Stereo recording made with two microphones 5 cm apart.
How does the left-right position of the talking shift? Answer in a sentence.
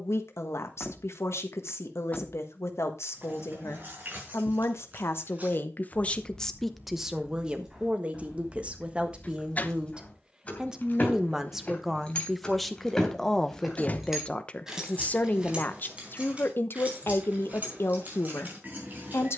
In this clip you hear the talking go right and come back.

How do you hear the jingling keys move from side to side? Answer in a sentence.
You can hear the jingling keys go left and come back.